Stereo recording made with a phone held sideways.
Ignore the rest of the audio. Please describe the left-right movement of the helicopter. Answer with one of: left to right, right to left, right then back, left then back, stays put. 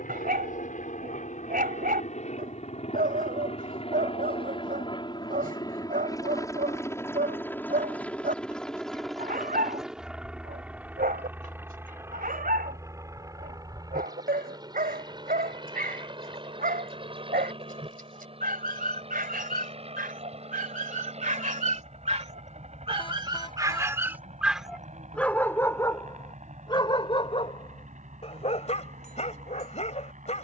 left to right.